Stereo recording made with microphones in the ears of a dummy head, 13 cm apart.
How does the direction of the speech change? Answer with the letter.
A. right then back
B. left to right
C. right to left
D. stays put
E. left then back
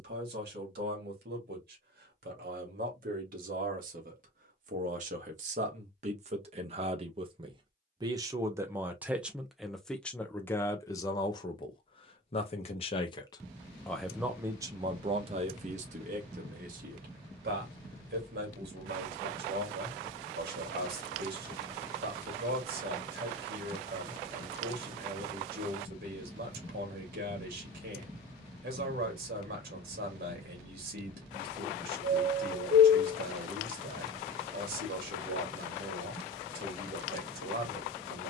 E.